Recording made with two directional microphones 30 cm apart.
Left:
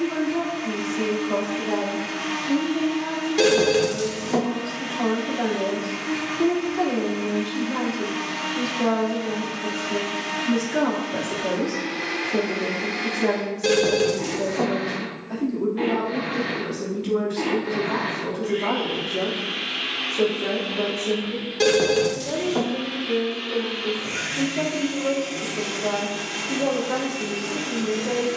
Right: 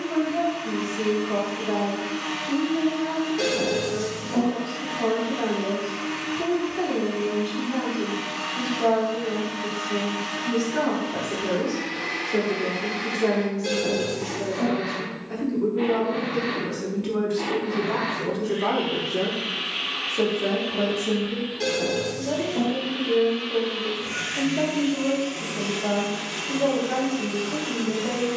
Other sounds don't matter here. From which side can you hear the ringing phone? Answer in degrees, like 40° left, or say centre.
60° left.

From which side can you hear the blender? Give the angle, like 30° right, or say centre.
60° left.